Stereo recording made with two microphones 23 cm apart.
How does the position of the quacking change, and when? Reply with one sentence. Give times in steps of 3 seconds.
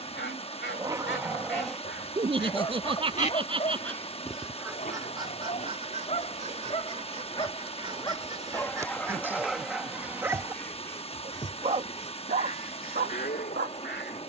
In this clip you hear the quacking on the left from 0 s, in the centre from 3 s, on the right from 6 s, in the centre from 9 s and on the left from 12 s.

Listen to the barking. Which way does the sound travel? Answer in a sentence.
You can hear the barking go left and come back.